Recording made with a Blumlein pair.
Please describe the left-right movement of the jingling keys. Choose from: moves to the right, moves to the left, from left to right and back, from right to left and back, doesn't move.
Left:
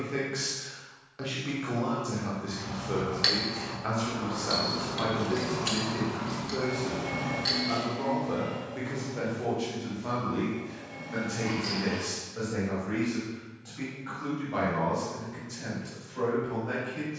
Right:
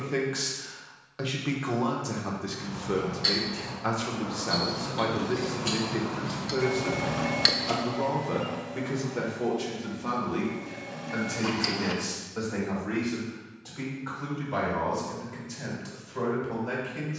moves to the right.